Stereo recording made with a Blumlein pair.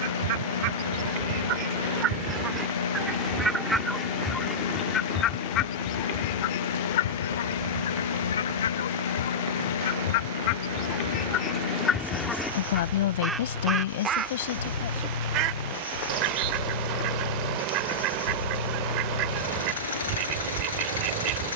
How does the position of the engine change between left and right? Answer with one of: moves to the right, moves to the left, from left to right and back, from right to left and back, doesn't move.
doesn't move.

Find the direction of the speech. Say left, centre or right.
left.